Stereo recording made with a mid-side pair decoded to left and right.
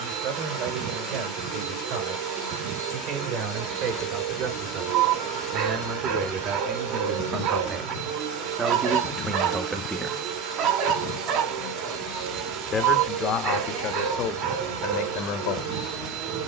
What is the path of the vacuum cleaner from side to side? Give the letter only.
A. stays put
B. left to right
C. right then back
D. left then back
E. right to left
A.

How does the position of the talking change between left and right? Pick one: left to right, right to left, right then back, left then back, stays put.
right to left.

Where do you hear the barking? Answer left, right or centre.
right.